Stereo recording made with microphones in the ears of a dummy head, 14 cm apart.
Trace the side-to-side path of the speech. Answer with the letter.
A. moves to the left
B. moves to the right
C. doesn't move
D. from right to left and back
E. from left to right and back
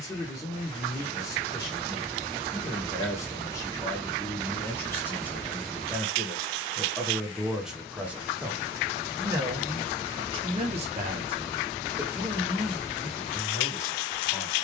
E.